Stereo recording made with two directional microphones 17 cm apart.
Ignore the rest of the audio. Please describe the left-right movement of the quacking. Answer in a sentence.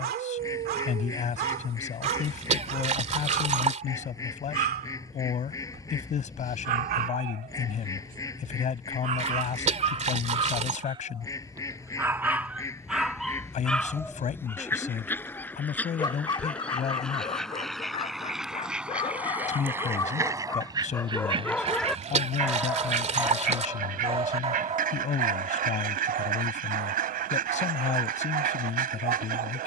In this clip you hear the quacking move to the right.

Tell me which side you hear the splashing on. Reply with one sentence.
In this clip you hear the splashing on the right.